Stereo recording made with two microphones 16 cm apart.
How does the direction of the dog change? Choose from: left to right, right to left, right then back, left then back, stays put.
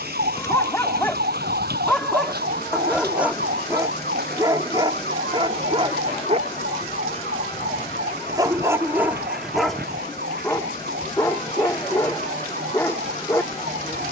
right then back.